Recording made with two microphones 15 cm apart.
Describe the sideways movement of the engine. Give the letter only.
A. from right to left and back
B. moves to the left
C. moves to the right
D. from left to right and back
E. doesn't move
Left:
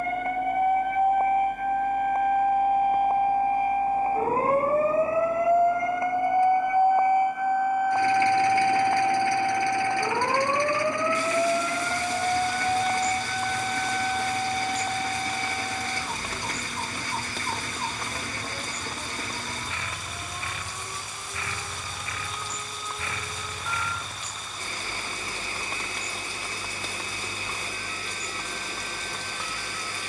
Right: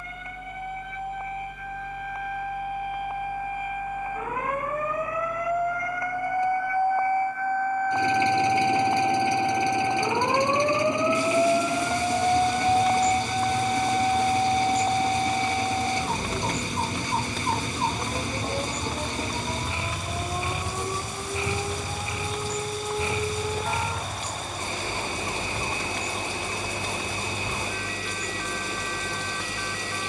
E.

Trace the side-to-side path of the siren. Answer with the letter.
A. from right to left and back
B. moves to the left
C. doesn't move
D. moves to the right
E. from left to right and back
D.